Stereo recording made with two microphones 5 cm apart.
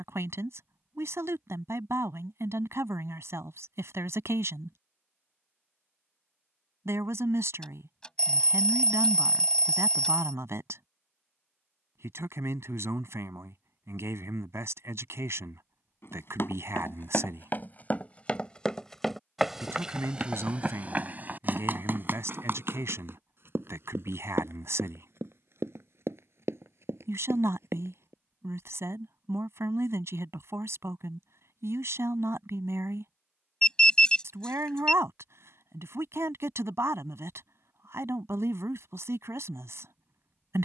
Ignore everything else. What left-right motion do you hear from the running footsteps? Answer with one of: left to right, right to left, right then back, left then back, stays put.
left to right.